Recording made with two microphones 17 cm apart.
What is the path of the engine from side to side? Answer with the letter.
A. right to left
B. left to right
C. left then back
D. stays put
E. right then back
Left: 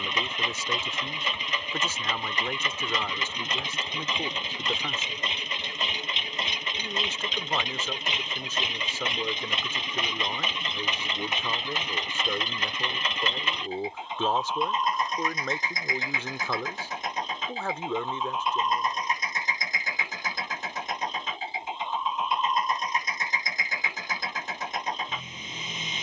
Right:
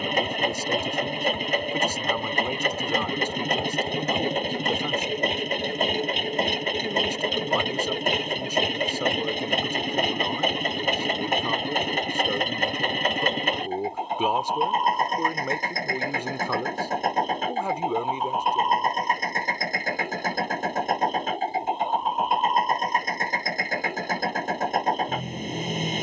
D.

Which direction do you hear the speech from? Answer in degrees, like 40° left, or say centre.
10° right.